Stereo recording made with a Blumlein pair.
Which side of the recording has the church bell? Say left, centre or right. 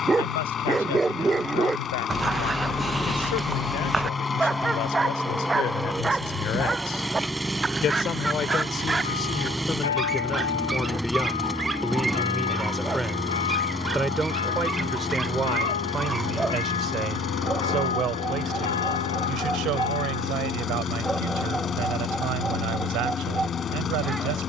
left.